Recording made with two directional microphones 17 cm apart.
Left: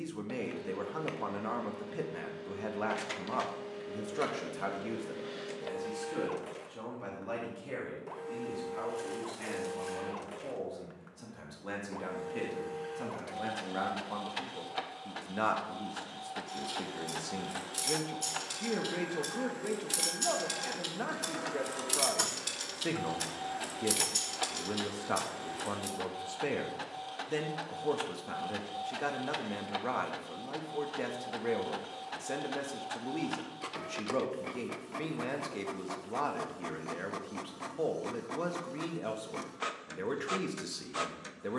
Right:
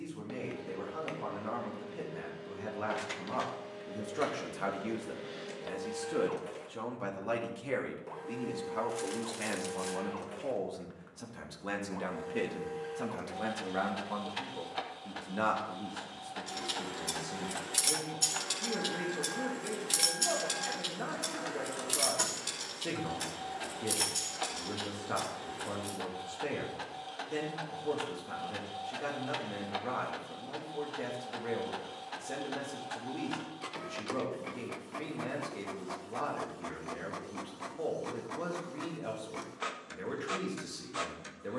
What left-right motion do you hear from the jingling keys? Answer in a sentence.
You can hear the jingling keys move from right to left.